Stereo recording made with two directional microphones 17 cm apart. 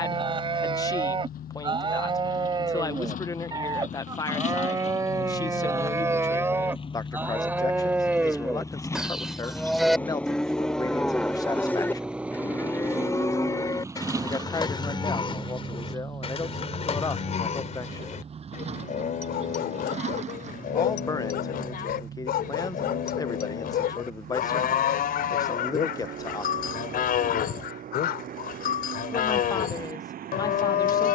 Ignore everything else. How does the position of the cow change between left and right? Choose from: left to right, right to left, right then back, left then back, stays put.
right to left.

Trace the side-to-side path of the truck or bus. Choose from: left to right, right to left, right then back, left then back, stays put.
left to right.